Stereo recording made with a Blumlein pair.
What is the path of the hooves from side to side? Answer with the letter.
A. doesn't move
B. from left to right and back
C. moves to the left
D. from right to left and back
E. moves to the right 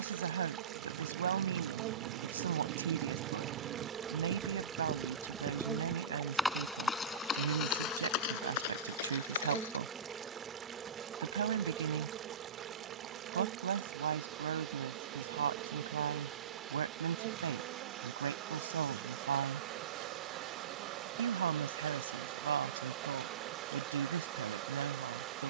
C.